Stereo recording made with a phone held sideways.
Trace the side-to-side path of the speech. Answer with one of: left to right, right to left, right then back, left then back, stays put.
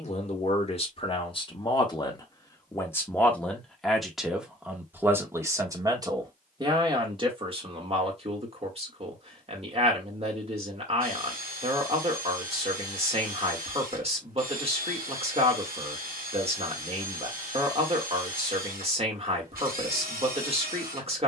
left to right.